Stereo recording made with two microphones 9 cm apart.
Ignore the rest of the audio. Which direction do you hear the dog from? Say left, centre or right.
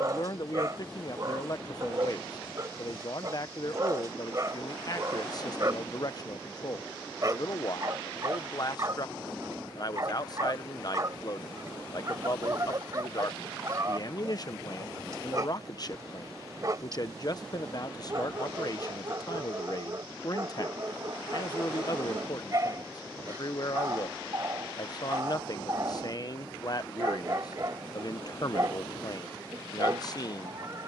right.